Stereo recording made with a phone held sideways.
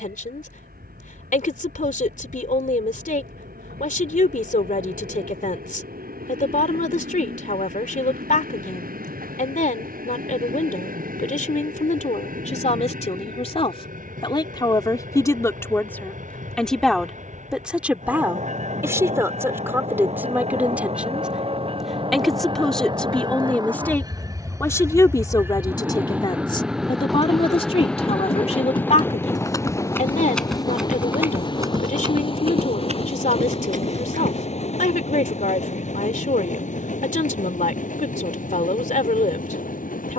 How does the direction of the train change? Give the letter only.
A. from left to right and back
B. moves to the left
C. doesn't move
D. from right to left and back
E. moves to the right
B.